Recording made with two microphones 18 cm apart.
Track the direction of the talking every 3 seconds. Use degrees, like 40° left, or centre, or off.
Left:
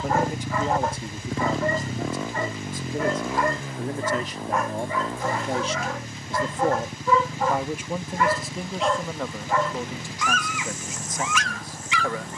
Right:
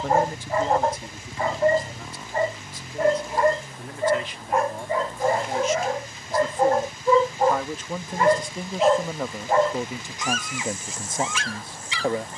30° left, 40° left, 10° left, 20° right.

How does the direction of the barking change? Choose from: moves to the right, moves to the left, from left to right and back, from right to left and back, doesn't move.
doesn't move.